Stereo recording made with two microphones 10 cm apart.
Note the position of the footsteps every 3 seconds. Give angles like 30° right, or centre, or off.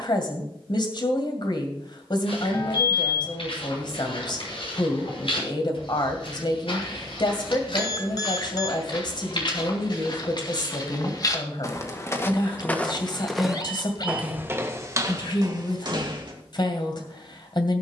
70° left, 70° left, 60° left, 50° left, centre, 50° right.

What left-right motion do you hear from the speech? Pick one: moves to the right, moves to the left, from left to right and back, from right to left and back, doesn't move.
doesn't move.